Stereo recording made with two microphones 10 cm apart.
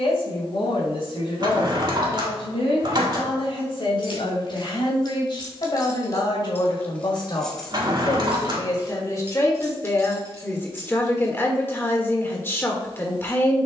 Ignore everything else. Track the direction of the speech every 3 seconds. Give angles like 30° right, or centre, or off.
60° left, 60° left, 40° left, 20° left, 20° left.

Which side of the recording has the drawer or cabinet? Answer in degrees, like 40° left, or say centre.
50° right.